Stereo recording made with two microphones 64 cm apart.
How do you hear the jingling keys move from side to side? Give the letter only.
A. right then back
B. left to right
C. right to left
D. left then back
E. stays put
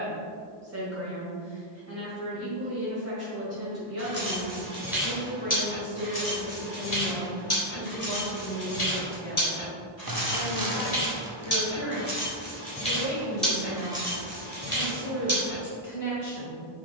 D.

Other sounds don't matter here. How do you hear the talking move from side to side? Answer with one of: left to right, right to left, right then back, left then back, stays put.
right to left.